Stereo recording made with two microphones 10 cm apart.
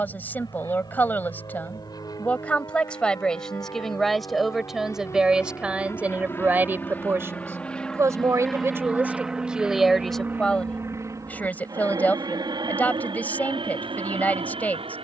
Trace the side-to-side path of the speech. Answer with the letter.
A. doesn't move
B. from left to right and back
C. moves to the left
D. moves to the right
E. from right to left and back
B.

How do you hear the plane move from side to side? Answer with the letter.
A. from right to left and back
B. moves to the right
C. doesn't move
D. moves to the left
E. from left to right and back
B.